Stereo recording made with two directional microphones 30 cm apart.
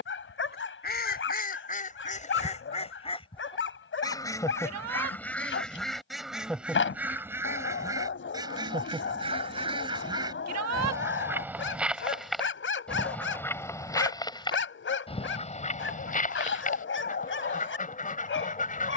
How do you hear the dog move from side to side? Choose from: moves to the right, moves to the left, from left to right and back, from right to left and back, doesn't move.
doesn't move.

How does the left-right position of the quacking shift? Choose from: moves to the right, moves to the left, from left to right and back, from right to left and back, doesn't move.
from left to right and back.